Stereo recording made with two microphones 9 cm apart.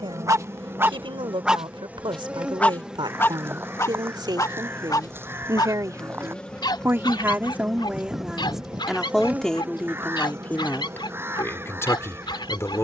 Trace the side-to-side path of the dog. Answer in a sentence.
You can hear the dog travel towards the left.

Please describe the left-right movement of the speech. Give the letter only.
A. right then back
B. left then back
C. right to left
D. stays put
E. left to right
C.